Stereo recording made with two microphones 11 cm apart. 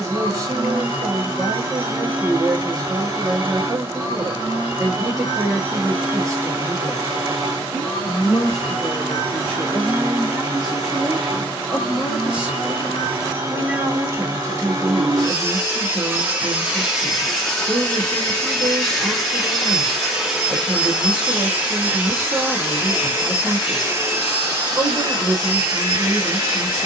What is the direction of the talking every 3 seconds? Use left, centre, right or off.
right, right, centre, centre, right, right, right, right, right.